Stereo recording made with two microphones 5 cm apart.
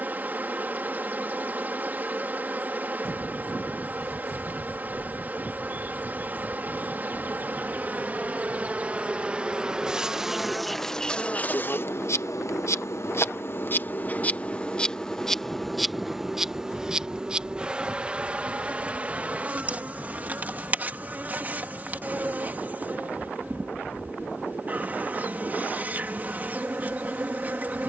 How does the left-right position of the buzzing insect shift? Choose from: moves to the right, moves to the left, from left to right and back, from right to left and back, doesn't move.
from right to left and back.